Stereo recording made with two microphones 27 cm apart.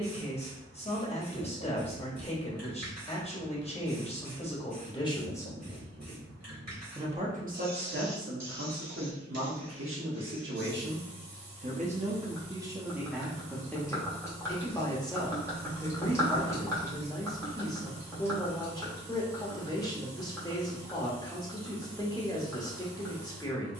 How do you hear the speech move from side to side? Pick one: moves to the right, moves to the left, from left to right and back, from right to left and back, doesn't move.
from left to right and back.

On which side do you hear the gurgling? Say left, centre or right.
centre.